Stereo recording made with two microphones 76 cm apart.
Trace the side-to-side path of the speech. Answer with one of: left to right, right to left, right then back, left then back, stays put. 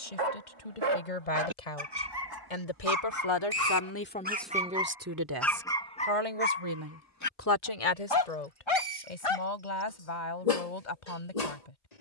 right then back.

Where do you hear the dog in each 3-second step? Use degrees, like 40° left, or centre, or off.
40° right, 10° right, 20° left, 50° left.